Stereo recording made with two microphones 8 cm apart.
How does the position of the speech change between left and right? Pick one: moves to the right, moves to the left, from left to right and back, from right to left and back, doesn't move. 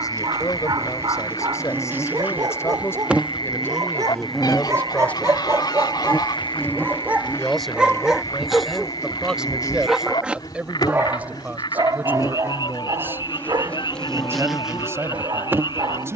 moves to the right.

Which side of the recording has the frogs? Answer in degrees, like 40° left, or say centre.
70° left.